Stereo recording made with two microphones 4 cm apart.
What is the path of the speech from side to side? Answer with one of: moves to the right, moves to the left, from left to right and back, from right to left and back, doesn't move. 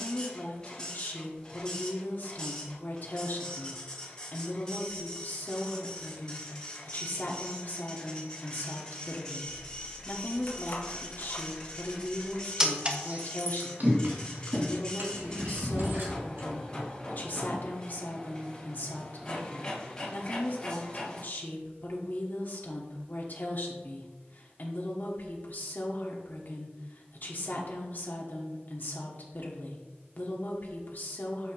doesn't move.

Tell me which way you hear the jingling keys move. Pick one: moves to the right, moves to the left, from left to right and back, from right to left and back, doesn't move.
moves to the right.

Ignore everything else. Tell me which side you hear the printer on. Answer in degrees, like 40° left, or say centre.
20° left.